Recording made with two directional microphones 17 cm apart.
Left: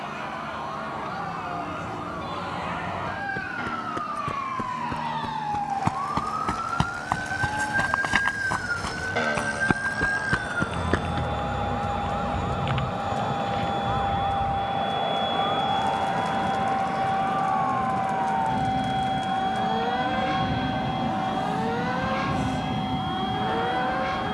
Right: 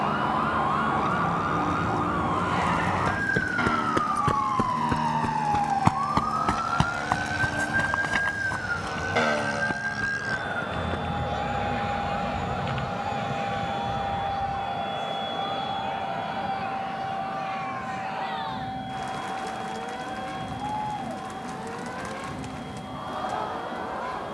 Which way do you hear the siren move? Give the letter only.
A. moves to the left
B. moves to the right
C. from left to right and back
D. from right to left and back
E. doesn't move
A.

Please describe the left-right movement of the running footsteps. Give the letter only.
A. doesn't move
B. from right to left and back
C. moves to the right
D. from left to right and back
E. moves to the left
E.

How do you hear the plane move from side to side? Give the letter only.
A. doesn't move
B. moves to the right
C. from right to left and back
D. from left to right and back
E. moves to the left
E.